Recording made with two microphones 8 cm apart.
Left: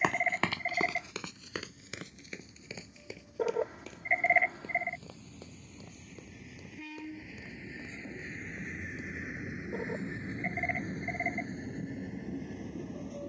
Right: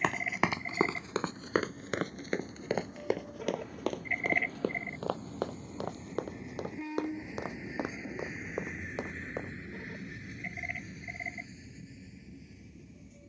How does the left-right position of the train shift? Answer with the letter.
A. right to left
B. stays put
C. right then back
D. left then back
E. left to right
A.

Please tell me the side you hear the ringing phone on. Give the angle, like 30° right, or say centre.
40° left.